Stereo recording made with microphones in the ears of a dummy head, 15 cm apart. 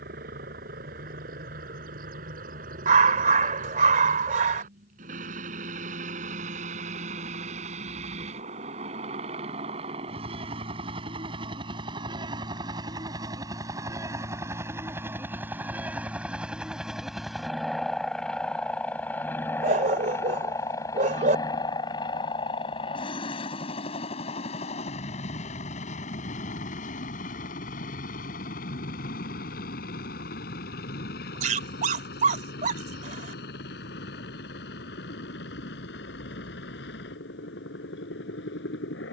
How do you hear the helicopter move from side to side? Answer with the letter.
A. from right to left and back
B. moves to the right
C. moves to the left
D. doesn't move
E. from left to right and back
C.